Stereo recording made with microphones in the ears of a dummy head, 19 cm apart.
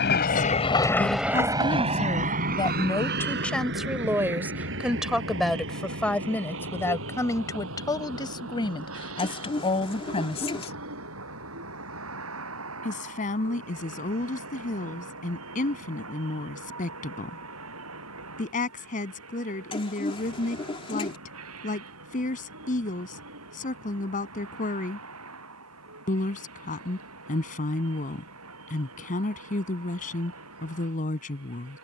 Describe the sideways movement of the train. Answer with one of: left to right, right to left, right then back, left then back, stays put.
left to right.